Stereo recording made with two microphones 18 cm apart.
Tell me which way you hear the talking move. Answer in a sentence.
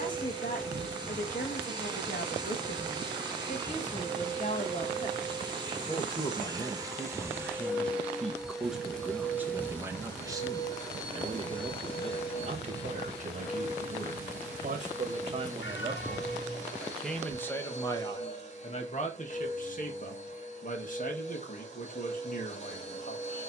You can hear the talking move from left to right and back again.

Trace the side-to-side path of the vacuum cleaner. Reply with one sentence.
You can hear the vacuum cleaner move to the left.